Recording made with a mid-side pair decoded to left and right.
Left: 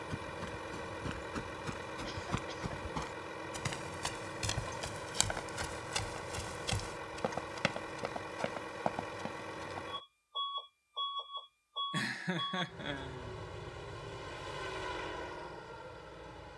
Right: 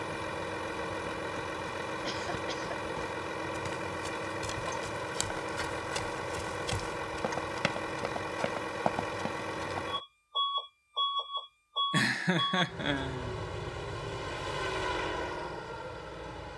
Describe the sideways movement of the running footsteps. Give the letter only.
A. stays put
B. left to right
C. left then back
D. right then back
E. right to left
B.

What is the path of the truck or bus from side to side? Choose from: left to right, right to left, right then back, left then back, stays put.
stays put.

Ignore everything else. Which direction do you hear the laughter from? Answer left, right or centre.
right.